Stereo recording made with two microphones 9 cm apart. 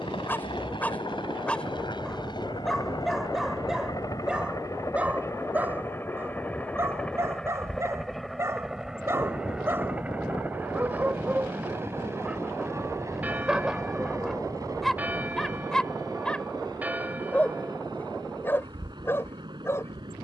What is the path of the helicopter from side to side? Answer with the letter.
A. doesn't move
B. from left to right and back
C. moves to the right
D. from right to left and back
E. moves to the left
C.